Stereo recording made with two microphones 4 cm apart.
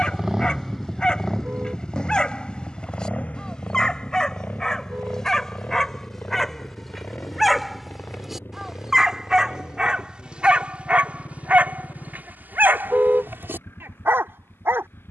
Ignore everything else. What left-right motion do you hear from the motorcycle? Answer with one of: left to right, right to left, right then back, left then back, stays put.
right to left.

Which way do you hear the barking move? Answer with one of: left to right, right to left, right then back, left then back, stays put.
left to right.